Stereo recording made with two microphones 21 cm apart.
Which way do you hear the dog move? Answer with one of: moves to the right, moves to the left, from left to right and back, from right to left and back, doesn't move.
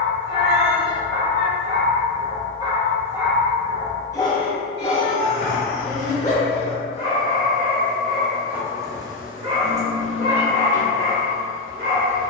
from right to left and back.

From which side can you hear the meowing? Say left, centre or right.
right.